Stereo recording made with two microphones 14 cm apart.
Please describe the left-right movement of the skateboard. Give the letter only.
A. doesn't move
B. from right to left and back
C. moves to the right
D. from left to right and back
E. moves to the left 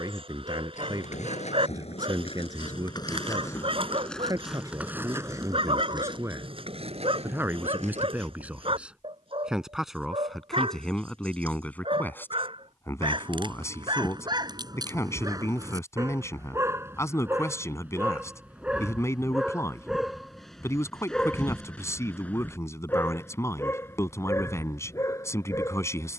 C.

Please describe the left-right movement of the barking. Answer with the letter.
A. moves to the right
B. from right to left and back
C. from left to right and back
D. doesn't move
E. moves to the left
E.